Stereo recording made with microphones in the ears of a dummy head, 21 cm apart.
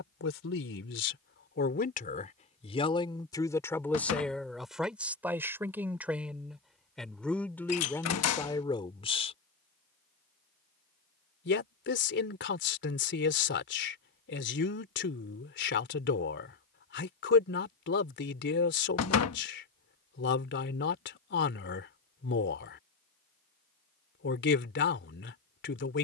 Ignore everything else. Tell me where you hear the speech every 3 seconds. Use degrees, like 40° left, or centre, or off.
40° left, centre, 10° left, 40° left, 50° left, 50° left, 50° left, 50° left, 50° left.